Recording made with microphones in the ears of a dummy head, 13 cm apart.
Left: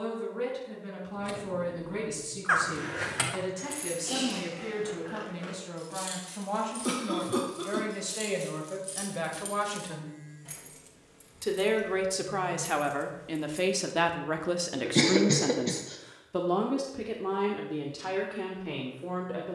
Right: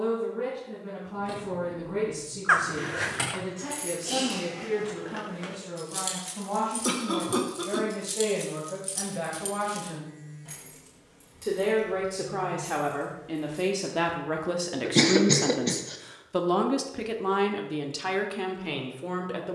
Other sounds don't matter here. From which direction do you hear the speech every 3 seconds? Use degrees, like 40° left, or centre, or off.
80° left, 80° left, 70° left, 60° left, 30° left, 30° right, 60° right.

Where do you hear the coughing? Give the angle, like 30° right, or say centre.
10° right.